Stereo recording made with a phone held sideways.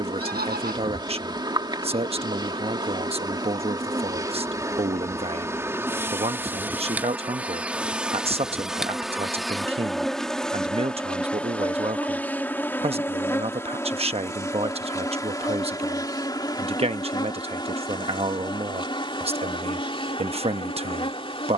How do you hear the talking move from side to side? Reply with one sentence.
You can hear the talking stay in one place.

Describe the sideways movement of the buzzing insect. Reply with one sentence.
In this clip you hear the buzzing insect move from right to left.